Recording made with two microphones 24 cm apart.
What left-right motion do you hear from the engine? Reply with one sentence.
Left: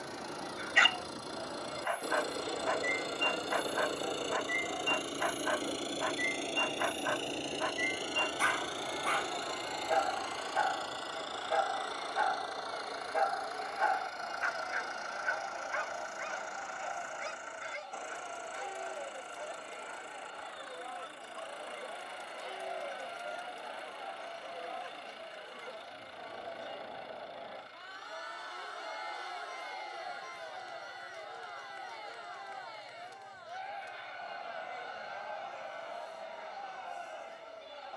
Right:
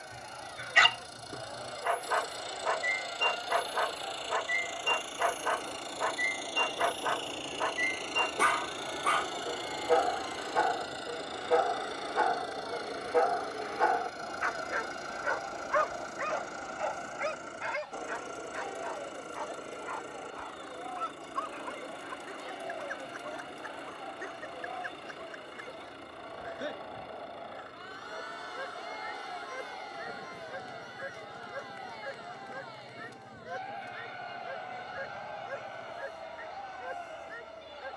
You can hear the engine go from the left side to the right.